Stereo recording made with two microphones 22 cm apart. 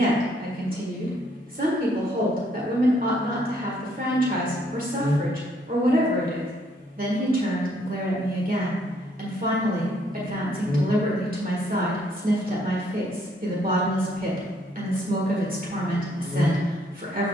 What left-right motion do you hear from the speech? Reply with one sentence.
You can hear the speech stay put.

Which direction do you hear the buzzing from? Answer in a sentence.
In this clip you hear the buzzing on the right.